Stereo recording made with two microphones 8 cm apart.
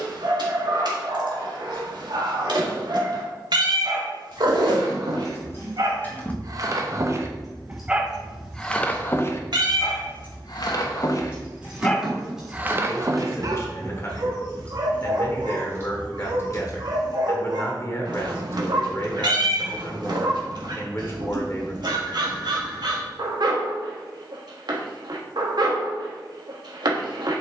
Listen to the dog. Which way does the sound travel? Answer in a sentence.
In this clip you hear the dog go left and come back.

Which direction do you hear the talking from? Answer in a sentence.
You can hear the talking on the left.